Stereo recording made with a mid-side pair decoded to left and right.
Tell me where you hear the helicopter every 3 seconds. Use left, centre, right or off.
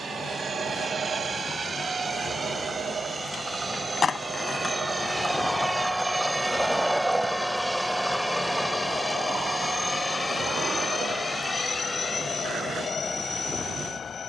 right, right, centre, left, left.